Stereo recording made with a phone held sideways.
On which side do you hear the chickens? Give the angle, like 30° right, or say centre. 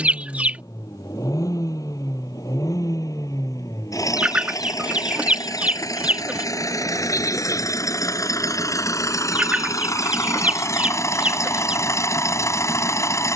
10° right.